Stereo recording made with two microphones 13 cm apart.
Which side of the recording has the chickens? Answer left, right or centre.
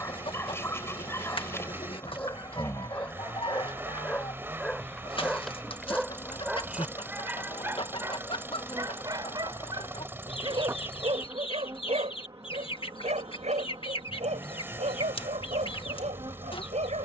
left.